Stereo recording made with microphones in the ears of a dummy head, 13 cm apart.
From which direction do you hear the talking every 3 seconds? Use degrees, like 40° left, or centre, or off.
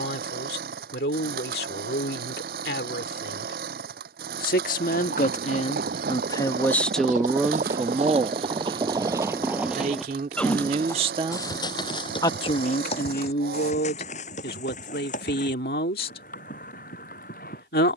80° left, 60° left, centre, 50° right, 60° left, 70° left.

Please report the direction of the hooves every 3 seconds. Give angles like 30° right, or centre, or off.
off, 70° right, 50° right, 10° left, 40° left, 60° left.